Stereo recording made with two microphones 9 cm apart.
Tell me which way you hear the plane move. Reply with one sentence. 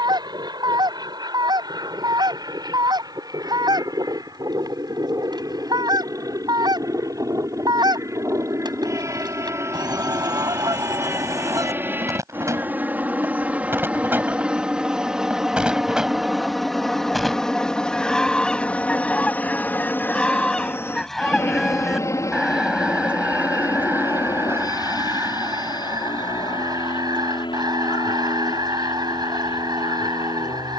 In this clip you hear the plane go from the right side to the left.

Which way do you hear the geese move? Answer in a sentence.
In this clip you hear the geese go left and come back.